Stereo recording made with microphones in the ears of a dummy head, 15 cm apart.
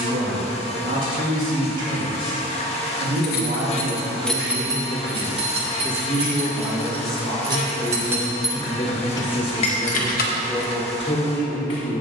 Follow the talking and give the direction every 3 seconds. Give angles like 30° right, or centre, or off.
50° right, 30° right, 10° left, 30° left.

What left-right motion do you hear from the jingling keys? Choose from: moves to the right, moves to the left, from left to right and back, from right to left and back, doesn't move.
from left to right and back.